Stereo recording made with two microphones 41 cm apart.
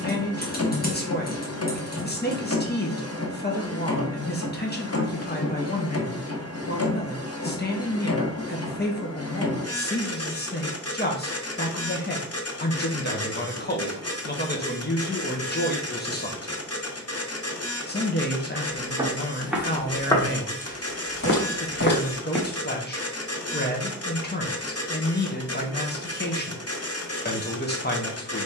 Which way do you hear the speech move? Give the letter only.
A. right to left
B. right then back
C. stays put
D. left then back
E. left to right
C.